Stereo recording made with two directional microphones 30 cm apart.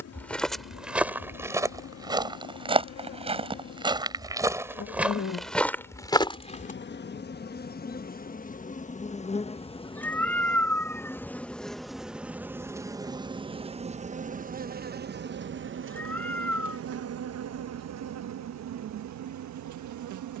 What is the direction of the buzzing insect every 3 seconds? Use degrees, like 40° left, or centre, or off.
50° left, 40° left, 30° left, 10° left, 20° right, 40° right, 60° right.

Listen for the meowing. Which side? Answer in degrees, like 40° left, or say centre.
10° left.